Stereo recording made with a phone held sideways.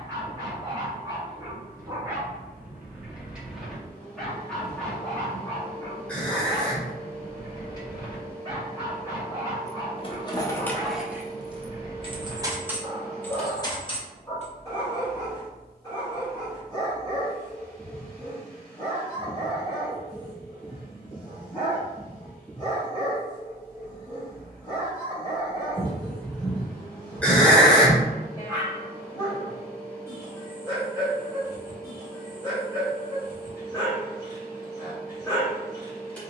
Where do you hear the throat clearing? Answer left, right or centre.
centre.